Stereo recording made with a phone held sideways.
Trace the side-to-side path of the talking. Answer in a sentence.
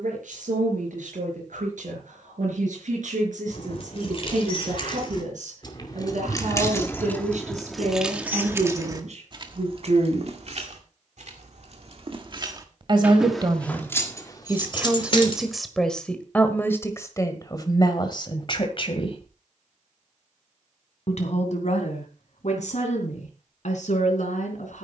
You can hear the talking go from the right side to the left.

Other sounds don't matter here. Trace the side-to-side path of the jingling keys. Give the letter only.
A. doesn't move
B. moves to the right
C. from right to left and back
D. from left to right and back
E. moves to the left
D.